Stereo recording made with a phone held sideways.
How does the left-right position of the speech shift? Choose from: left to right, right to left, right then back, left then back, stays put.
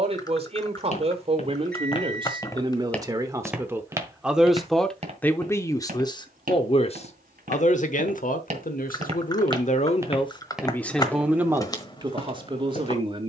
left then back.